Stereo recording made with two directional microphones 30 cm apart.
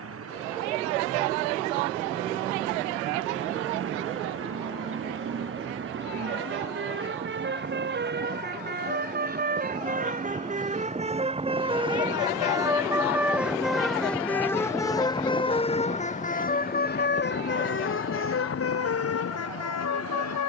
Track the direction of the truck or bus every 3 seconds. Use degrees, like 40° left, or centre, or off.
50° right, 50° right, 40° right, 20° right, centre, 30° left, 50° left.